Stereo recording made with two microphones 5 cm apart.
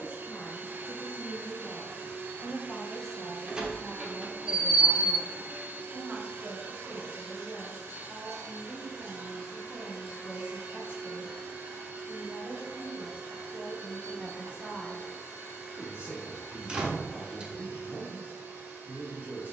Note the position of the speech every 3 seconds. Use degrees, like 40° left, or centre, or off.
30° left, 10° right, 30° right, 30° right, 30° right, 30° right, 30° right.